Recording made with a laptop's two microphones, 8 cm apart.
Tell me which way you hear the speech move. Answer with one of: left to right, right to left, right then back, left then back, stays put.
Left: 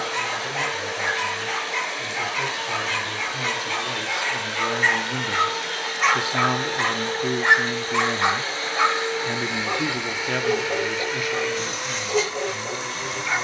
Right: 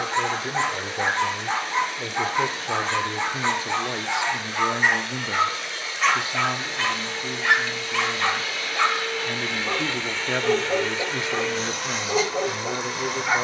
left then back.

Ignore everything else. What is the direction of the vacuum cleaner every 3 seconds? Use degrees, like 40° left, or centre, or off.
80° left, 70° left, 40° left, 10° left, 10° right.